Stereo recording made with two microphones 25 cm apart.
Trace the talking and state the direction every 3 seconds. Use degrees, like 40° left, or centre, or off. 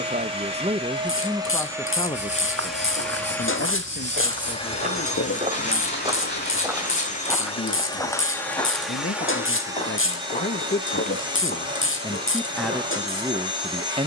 centre, 60° left, 60° left, 40° left, 10° right.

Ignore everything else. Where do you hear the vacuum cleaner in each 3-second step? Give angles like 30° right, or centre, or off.
10° right, 20° left, 20° left, 20° right, 20° right.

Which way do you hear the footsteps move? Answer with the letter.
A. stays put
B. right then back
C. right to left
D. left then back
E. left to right
C.